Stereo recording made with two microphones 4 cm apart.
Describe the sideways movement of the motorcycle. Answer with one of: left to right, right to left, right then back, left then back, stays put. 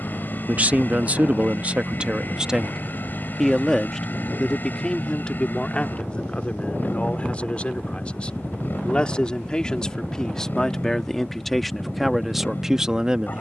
stays put.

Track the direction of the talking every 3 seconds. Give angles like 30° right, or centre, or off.
30° right, 10° left, 30° left, 10° left, 10° right.